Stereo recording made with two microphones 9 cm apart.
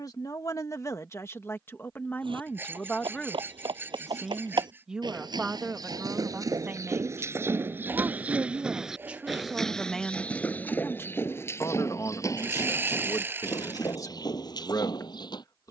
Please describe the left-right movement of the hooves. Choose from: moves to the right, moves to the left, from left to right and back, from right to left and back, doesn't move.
moves to the left.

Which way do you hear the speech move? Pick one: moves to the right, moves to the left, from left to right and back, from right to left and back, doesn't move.
from left to right and back.